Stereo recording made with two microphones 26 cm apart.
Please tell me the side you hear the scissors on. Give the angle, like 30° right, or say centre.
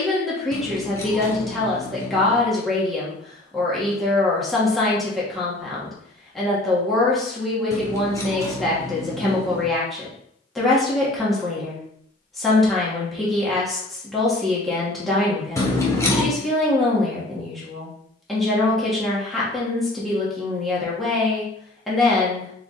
10° left.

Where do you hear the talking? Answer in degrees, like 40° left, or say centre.
centre.